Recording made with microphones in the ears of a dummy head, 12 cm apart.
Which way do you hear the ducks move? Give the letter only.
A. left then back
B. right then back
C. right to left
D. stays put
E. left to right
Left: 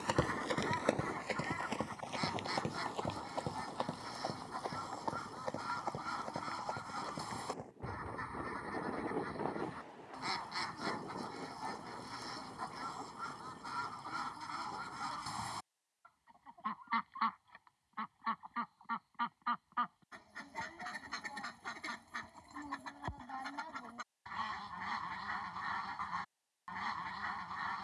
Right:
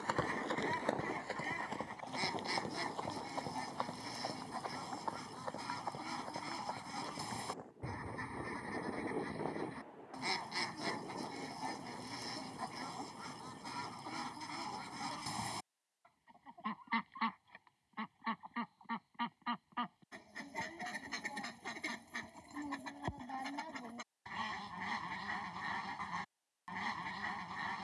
D.